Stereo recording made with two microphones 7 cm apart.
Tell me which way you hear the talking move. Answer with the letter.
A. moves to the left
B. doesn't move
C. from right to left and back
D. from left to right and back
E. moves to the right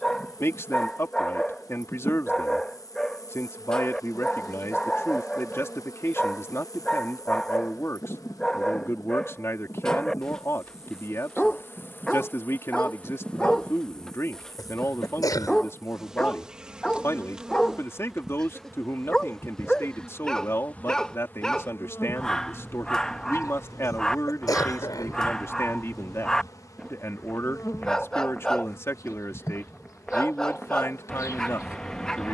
B.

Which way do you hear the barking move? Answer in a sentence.
In this clip you hear the barking stay in one place.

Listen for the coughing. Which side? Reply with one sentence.
You can hear the coughing on the left.